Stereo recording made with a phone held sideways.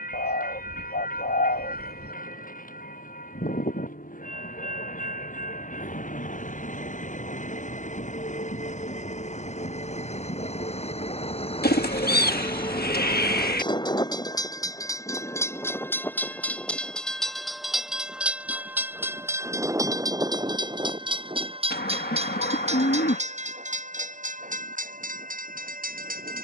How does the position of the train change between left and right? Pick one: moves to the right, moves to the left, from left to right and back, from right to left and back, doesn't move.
moves to the right.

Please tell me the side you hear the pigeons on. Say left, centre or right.
left.